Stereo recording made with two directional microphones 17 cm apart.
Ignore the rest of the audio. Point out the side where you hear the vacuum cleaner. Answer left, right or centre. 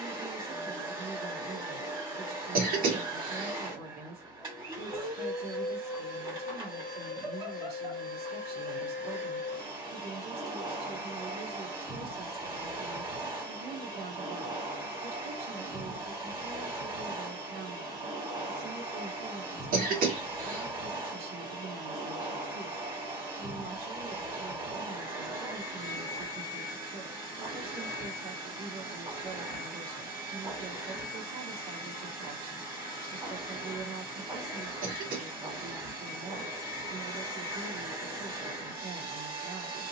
right.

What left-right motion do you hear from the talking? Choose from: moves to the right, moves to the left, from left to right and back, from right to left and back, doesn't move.
doesn't move.